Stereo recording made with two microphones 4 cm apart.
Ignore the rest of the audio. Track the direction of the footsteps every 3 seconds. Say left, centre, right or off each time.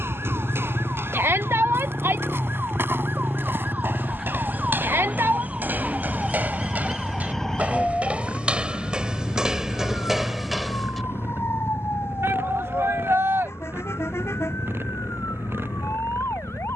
right, right, right, centre, off, off.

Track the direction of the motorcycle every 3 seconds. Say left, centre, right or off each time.
left, centre, right, right, right, right.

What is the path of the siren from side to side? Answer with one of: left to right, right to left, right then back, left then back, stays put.
right to left.